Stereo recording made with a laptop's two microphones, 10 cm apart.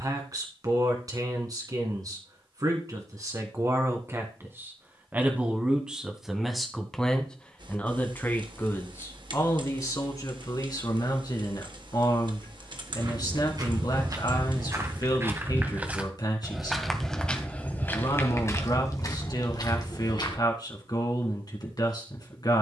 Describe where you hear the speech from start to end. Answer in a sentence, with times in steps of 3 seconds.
You can hear the speech on the right from 0 s, in the centre from 6 s and on the left from 9 s.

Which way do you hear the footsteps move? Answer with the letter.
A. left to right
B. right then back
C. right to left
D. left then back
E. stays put
C.